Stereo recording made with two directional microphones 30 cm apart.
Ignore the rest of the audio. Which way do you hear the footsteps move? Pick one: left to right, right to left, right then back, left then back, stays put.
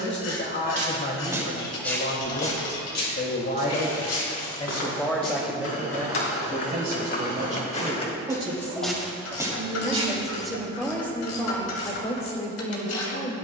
left then back.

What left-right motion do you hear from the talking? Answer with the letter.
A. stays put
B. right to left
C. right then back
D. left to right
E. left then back
C.